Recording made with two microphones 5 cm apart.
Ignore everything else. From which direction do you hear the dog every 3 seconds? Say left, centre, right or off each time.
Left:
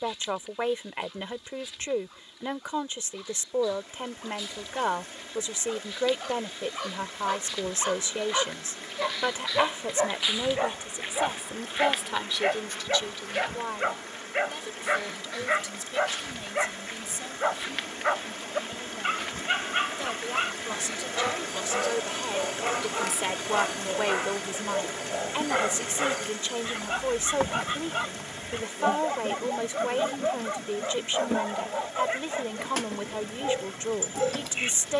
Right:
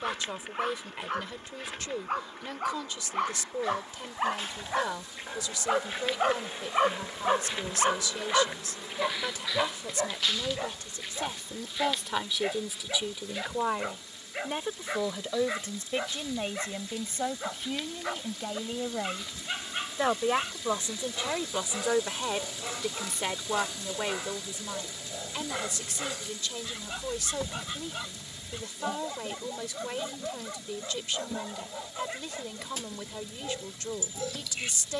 right, right, right, left, left, left, left, left, left, left, left, left.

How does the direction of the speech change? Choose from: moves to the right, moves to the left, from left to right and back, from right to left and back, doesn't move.
from left to right and back.